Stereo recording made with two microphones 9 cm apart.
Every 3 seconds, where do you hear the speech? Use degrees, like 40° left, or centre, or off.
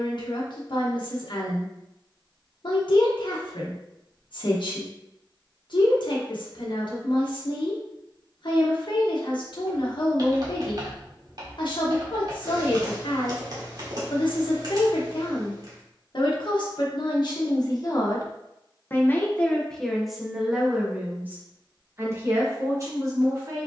60° left, 60° left, 60° left, 60° left, 60° left, 60° left, 10° left, 30° right.